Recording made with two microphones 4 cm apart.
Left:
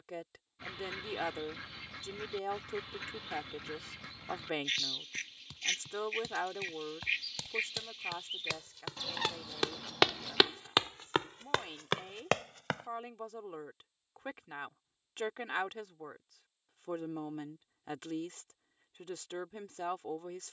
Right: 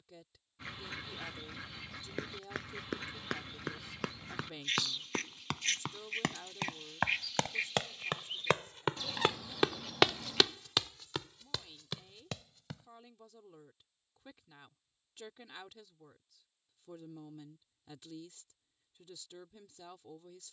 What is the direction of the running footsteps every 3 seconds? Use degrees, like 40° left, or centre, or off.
80° right, 70° right, 60° right, 20° left, 60° left, off, off.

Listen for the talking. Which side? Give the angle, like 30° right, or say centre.
70° left.